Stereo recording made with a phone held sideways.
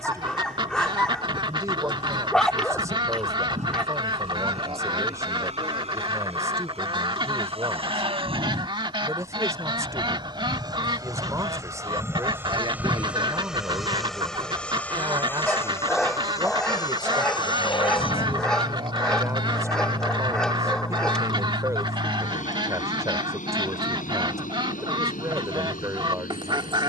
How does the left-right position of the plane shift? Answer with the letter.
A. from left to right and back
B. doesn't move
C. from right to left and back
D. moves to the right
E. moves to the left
E.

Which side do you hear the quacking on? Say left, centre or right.
right.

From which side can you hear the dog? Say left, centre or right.
centre.